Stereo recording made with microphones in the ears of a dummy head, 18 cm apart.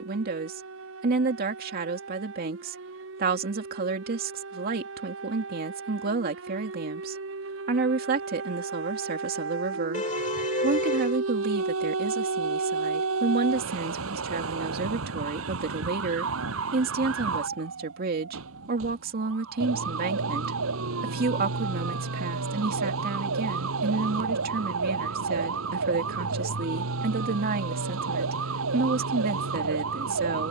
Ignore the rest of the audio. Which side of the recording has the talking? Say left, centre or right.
right.